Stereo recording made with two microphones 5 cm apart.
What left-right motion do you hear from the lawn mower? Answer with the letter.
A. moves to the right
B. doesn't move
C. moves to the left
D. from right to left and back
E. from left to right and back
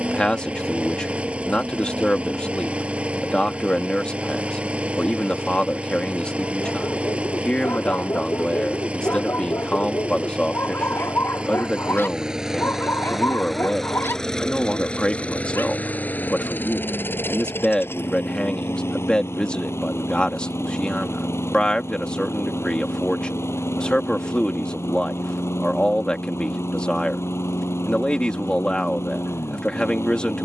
C.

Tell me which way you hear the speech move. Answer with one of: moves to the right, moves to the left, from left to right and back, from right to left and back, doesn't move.
doesn't move.